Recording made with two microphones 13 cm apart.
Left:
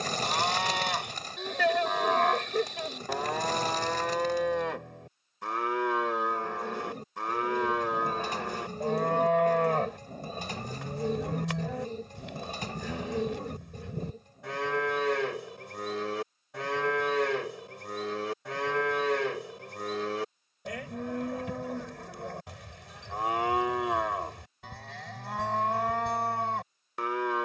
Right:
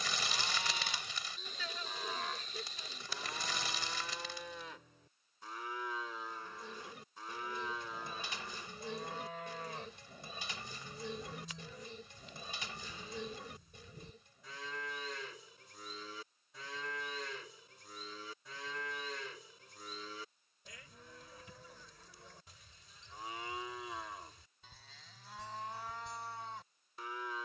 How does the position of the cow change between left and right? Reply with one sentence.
In this clip you hear the cow stay in one place.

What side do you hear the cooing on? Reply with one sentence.
You can hear the cooing on the left.